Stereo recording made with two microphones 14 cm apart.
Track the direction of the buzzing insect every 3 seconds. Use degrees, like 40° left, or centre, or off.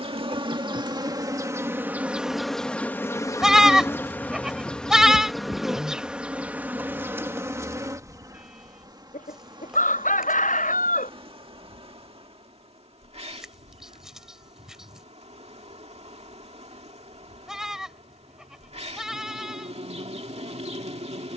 20° right, 10° left, 20° right, 40° right, 50° right, 50° right, 50° right.